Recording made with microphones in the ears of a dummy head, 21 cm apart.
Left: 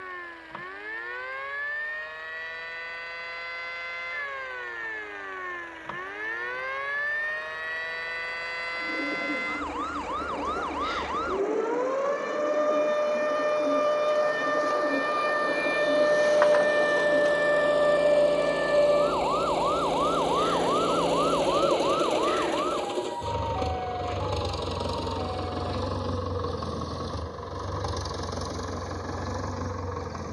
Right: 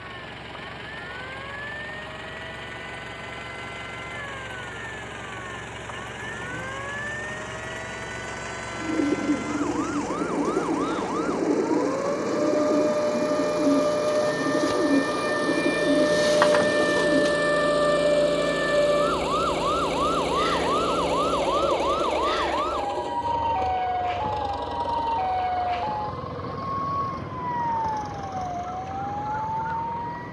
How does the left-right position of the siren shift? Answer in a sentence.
You can hear the siren go from the left side to the right.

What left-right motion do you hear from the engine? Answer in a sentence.
In this clip you hear the engine move from right to left.